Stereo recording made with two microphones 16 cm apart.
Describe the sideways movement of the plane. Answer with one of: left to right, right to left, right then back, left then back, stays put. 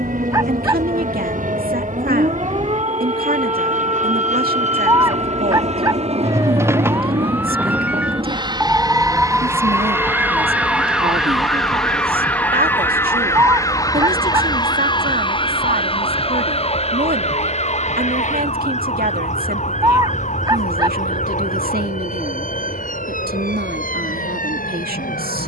right to left.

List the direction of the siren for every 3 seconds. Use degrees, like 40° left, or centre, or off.
40° right, 30° right, 10° right, 10° left, 20° left, 40° left, 50° left, 50° left, 60° left.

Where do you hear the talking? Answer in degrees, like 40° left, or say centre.
70° right.